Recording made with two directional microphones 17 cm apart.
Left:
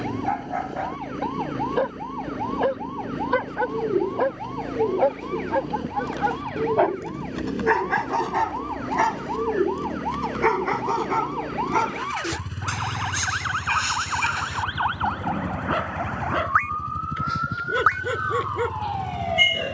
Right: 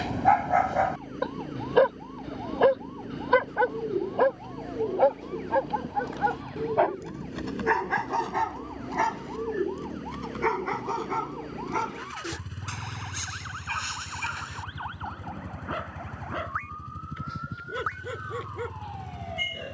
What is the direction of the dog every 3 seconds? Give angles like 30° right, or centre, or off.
30° right, centre, 20° left, 30° left, 40° left, 50° left, 50° left.